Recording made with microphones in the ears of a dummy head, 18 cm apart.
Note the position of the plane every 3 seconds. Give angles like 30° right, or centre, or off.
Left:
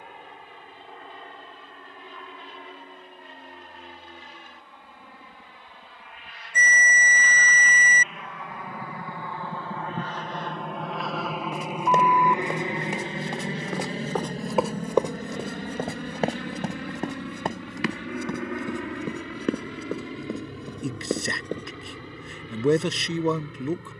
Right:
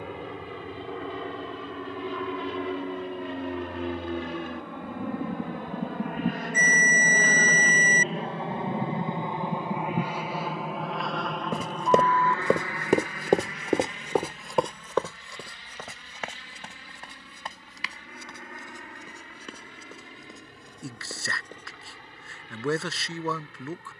60° right, 50° right, 40° right, 10° right, 20° left, 40° left, 60° left, 60° left.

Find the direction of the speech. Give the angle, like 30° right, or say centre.
20° left.